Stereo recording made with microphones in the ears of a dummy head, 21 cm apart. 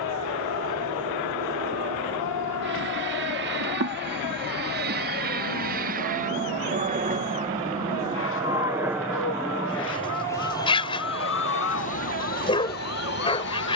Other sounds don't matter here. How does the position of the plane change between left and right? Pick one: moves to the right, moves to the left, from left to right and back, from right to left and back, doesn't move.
moves to the left.